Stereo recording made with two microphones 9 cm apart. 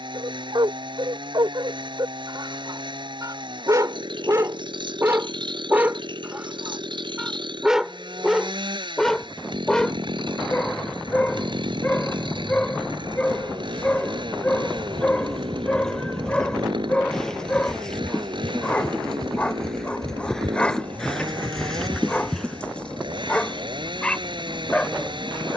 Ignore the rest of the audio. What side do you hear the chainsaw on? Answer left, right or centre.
right.